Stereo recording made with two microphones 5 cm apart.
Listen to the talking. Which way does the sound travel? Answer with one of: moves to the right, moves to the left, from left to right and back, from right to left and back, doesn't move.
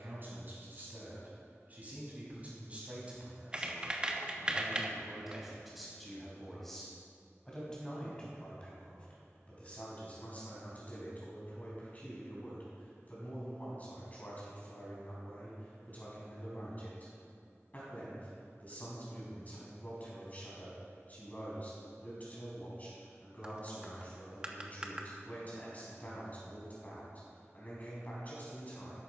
moves to the left.